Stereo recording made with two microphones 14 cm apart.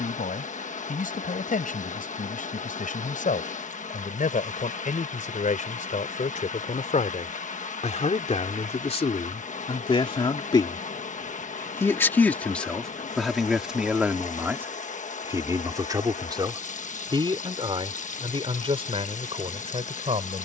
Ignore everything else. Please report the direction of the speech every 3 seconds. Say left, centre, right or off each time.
left, left, left, left, centre, right, right.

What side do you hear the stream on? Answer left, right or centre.
left.